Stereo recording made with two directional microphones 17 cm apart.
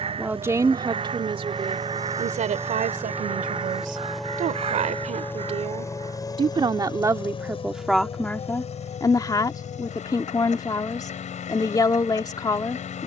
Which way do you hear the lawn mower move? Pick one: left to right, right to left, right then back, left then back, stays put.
right to left.